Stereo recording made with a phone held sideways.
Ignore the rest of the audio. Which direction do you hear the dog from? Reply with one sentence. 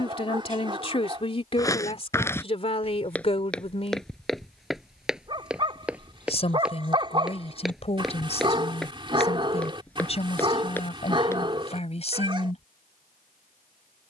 You can hear the dog on the right.